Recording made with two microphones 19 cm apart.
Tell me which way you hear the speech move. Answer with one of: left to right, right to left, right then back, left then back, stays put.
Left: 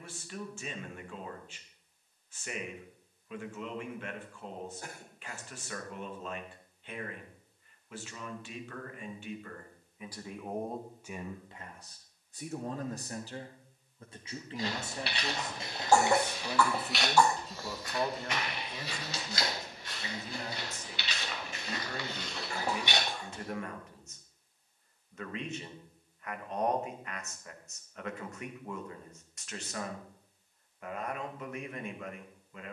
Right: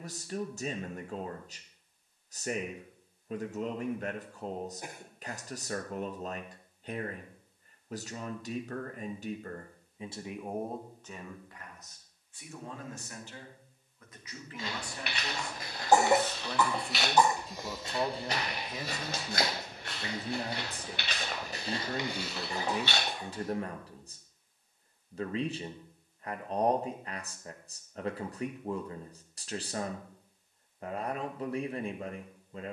left then back.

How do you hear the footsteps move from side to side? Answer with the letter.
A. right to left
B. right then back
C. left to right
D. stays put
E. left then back
B.